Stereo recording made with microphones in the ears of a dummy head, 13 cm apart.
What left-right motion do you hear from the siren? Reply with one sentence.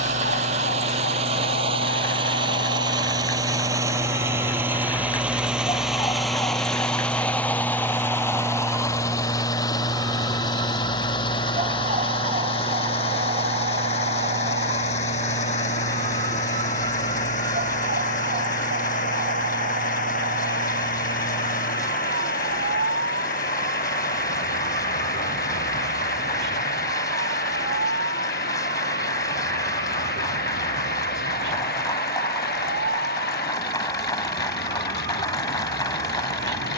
In this clip you hear the siren travel towards the right.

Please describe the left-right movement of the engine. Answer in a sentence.
You can hear the engine move from right to left.